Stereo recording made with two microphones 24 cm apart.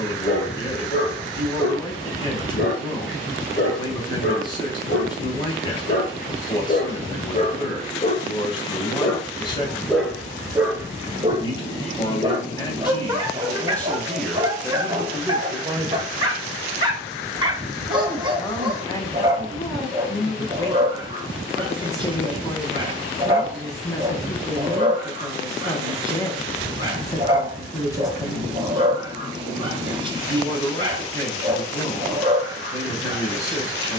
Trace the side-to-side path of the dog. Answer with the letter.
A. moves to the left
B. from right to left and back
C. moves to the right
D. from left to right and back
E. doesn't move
C.